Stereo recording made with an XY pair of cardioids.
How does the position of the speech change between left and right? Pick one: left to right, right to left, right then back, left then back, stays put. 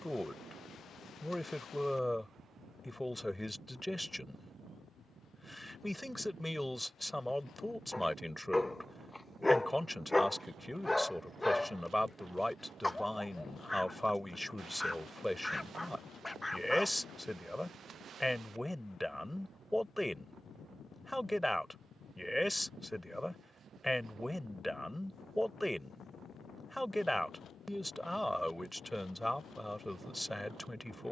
stays put.